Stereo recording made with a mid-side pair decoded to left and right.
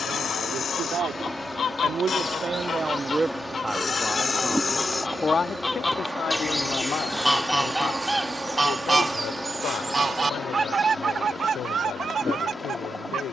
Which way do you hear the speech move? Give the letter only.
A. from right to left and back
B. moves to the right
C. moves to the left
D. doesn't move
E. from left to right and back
C.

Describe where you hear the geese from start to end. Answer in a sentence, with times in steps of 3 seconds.
In this clip you hear the geese on the left from 0 s, in the centre from 6 s and on the right from 9 s.